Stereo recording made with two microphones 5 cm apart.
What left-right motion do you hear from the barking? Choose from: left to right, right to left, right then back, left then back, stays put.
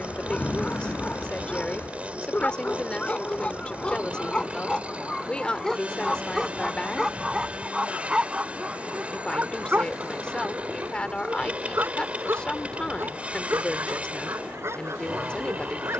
left to right.